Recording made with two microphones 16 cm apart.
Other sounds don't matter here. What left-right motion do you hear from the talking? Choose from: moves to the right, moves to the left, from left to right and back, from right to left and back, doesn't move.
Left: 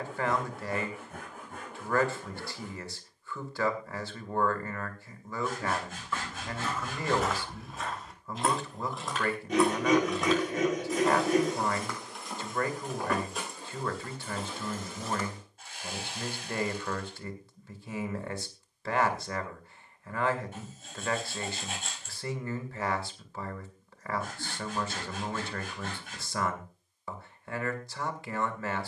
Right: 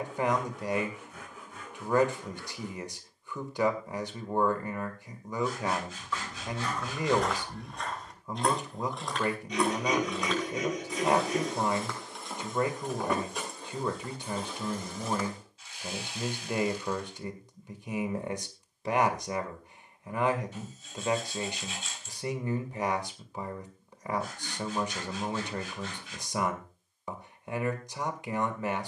doesn't move.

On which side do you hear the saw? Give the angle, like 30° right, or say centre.
50° left.